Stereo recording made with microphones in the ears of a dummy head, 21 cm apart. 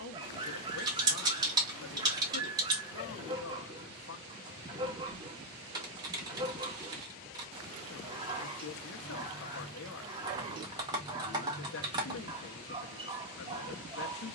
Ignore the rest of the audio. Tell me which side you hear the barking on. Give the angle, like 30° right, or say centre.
20° right.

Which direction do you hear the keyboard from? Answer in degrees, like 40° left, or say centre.
20° right.